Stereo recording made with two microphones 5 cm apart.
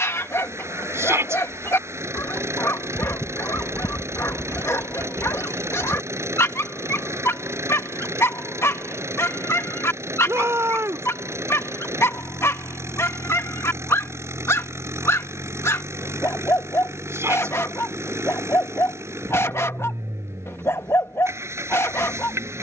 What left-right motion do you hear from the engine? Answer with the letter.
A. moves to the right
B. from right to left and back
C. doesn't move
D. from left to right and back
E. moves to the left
C.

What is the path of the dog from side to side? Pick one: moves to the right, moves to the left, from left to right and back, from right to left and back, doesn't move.
doesn't move.